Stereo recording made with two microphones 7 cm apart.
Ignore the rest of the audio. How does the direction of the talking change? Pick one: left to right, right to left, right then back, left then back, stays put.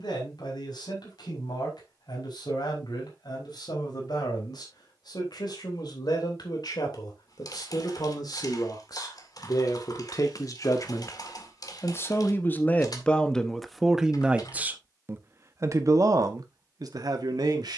left to right.